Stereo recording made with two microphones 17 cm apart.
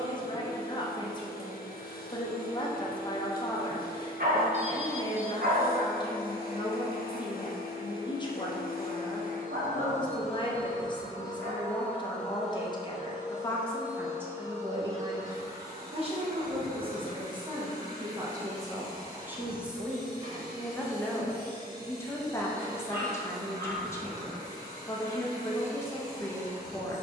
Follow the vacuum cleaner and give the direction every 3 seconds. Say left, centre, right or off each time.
left, left, left, left, centre, right, right, right, right.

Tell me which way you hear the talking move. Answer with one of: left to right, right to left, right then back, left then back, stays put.
right then back.